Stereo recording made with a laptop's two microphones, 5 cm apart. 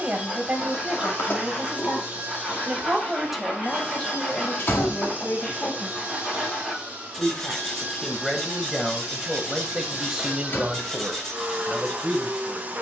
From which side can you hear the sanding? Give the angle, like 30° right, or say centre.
centre.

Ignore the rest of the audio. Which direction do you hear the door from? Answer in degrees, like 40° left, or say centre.
40° left.